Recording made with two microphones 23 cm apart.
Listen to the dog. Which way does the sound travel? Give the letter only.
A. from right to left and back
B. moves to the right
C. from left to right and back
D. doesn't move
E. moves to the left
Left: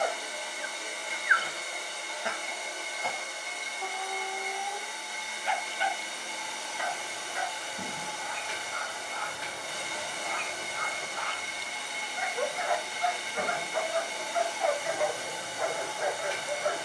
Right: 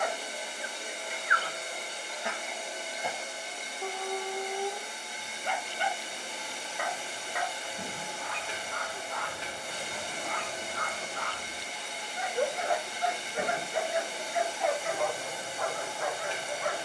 C.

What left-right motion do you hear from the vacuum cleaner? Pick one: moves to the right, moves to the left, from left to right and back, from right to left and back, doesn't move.
doesn't move.